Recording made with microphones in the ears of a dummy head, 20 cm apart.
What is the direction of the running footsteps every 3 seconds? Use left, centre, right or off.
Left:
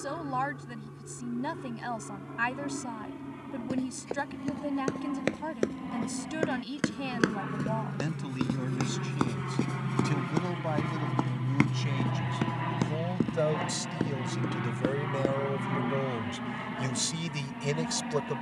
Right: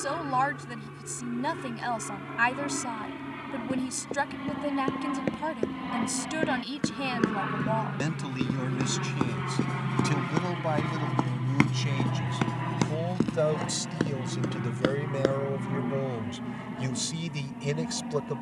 off, left, left, centre, right, off.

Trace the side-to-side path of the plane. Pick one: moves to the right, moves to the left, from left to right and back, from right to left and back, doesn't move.
moves to the left.